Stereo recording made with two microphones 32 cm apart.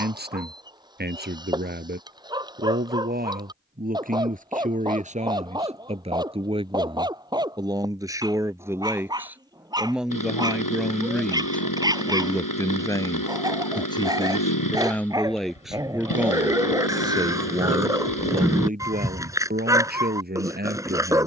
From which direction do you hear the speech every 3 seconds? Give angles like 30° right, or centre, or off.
30° right, 20° right, 10° right, centre, 10° left, 10° right, 30° right.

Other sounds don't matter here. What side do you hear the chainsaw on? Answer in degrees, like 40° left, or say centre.
80° left.